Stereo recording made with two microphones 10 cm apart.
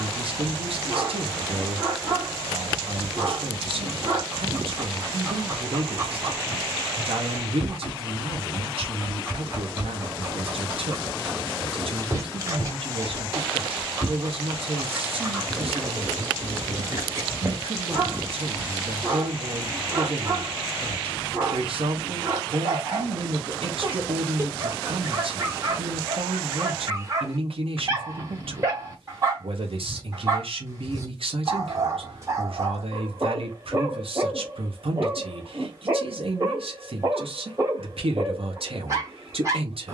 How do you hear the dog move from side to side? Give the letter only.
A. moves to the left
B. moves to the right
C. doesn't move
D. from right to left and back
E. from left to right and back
C.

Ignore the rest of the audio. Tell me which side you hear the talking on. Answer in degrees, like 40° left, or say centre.
70° right.